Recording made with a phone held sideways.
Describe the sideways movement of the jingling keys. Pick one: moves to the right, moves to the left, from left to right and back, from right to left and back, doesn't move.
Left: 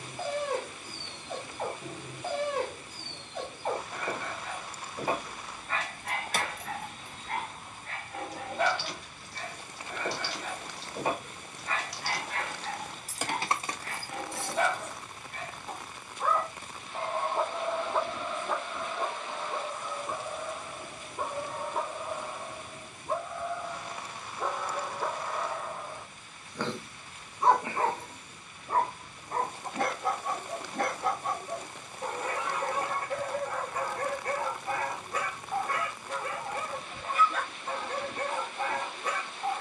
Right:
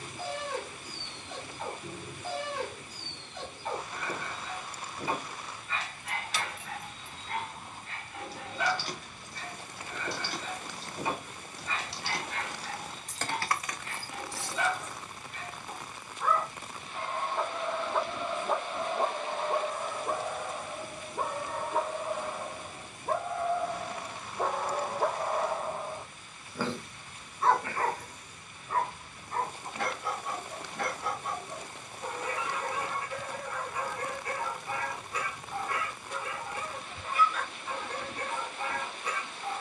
from left to right and back.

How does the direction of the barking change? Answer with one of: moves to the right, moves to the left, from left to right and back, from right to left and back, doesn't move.
from left to right and back.